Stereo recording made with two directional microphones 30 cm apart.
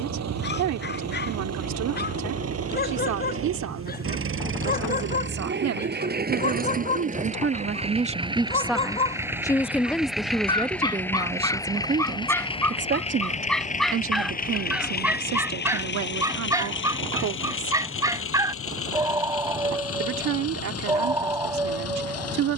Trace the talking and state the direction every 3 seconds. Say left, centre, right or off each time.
right, right, right, centre, right, right, right, right.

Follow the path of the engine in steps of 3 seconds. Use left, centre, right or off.
right, right, right, centre, left, left, left, left.